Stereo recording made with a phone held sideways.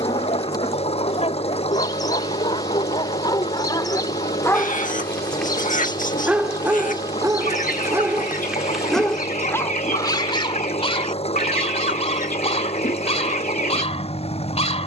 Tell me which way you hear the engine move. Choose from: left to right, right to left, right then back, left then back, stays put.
stays put.